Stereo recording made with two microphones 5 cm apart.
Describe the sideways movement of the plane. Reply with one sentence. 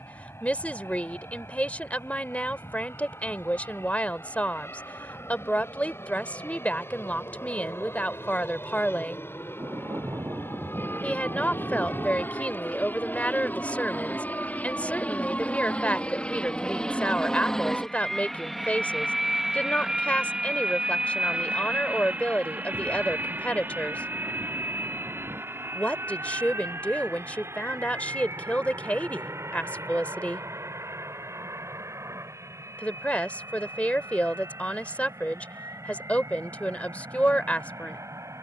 You can hear the plane move from left to right.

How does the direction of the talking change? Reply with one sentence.
In this clip you hear the talking stay in one place.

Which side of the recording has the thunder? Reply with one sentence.
You can hear the thunder on the right.